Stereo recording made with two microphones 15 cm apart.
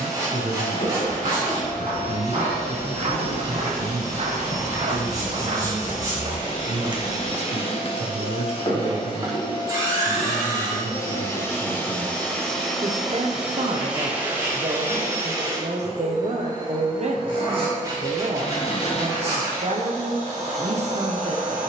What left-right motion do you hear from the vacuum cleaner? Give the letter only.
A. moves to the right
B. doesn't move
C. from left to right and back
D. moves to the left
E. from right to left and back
A.